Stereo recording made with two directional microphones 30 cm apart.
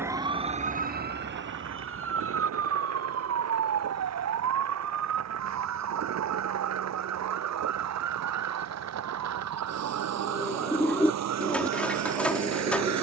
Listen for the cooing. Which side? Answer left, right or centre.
centre.